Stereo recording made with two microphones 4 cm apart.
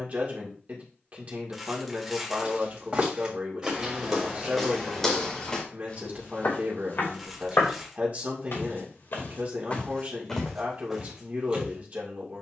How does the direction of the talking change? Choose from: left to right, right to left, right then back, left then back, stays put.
stays put.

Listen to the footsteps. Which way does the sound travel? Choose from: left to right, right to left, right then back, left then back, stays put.
left then back.